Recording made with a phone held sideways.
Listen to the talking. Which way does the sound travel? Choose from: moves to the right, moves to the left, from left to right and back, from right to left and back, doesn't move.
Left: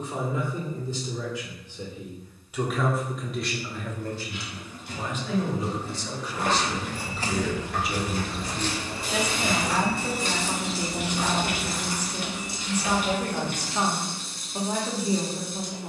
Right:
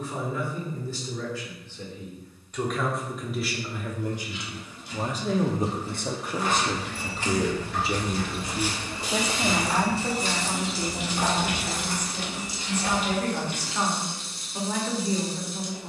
from left to right and back.